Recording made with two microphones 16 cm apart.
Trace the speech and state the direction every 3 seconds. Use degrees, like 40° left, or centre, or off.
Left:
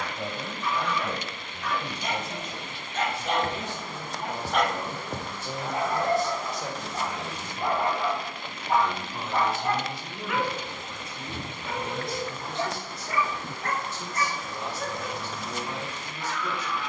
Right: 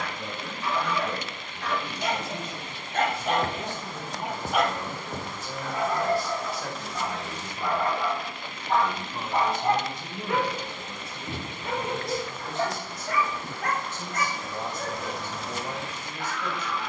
50° left, 40° left, 10° left, 30° right, 40° right, 50° right.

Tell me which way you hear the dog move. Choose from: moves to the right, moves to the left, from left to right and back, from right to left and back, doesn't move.
from right to left and back.